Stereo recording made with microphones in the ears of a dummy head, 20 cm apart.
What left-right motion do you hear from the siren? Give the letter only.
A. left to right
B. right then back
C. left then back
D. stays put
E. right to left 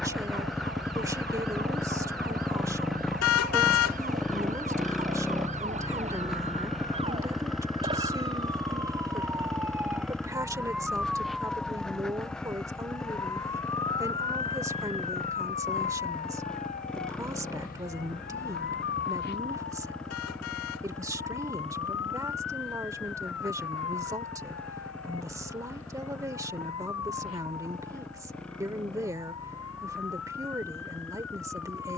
E.